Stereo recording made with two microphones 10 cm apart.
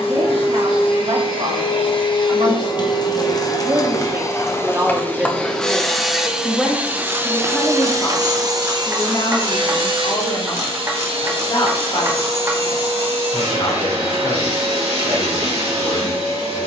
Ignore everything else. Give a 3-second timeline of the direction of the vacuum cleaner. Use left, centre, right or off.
left, left, right, right, right, right.